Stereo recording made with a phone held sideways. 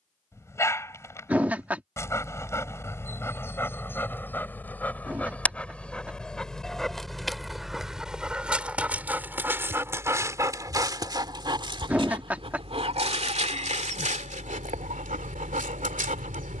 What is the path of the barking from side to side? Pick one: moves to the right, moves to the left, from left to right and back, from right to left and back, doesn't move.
moves to the right.